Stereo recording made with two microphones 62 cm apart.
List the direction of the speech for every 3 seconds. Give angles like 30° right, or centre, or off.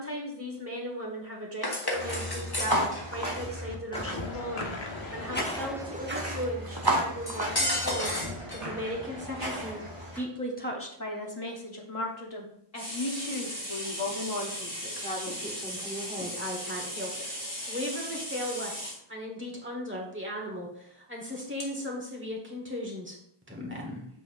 20° right, 20° right, 20° right, 20° left, 50° left, 10° right, 20° right, 20° right.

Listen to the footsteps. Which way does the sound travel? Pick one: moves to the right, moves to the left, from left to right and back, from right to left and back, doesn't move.
from right to left and back.